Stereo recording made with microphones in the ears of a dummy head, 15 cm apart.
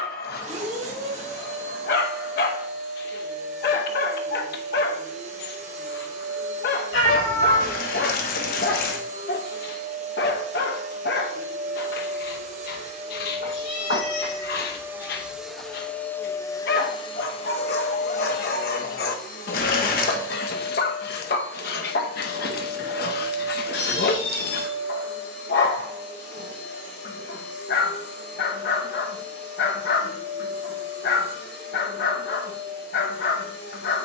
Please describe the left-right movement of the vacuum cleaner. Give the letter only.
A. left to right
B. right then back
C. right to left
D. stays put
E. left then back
C.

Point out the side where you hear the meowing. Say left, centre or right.
left.